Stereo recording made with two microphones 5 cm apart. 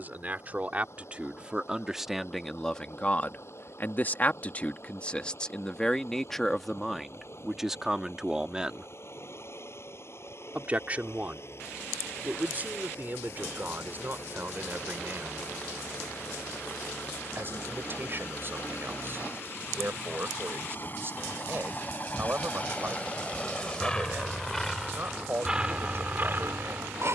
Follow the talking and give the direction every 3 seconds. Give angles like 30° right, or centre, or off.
10° right, 30° left, centre, 30° right, 40° right, 40° right, 40° right, 40° right, 40° right.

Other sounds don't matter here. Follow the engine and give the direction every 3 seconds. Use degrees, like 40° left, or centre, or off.
60° left, 60° left, 50° left, 50° left, 50° left, 50° left, 40° left, 30° left, 20° right.